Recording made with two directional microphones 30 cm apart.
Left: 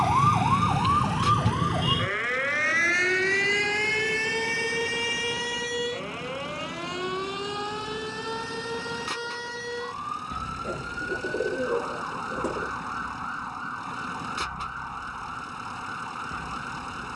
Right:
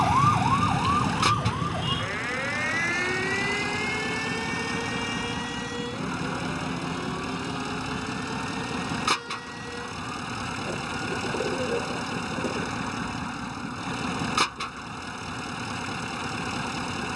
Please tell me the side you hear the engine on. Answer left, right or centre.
right.